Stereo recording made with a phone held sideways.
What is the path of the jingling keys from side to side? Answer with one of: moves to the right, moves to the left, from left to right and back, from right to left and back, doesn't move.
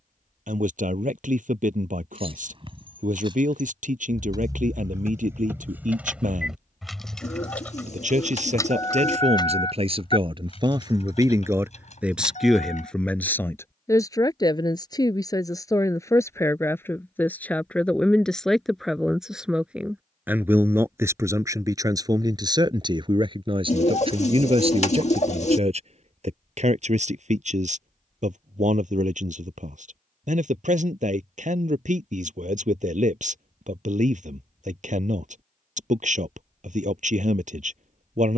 moves to the left.